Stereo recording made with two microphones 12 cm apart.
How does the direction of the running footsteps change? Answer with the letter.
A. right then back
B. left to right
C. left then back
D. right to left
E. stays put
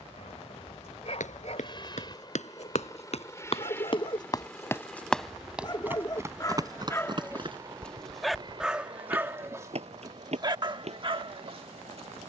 B.